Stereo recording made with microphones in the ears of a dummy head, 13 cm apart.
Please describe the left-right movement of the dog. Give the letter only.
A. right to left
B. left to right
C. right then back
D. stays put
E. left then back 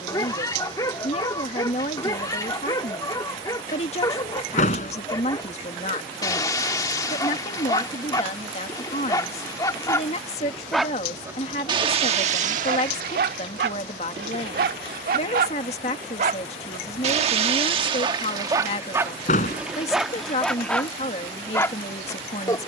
C.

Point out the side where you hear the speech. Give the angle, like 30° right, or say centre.
40° left.